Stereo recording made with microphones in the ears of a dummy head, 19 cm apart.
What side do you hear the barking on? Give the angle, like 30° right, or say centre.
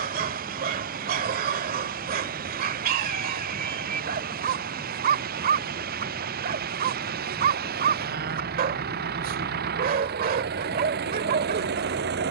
40° right.